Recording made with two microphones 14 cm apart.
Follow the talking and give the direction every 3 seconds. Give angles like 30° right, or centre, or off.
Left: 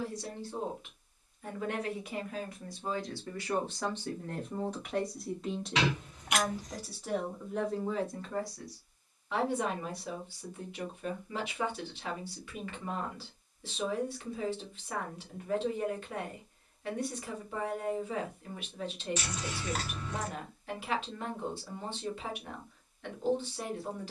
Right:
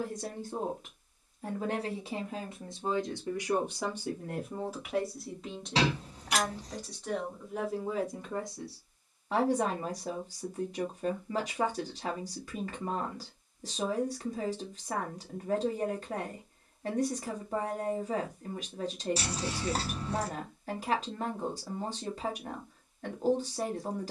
40° right, 10° right, 10° right, 40° right, 40° right, 40° right, 40° right, 40° right.